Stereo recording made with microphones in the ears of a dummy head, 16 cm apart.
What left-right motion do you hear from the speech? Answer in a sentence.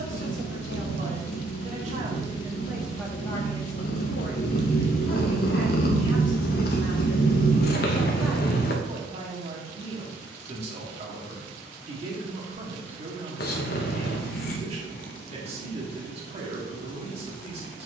In this clip you hear the speech go left and come back.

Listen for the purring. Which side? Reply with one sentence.
You can hear the purring on the left.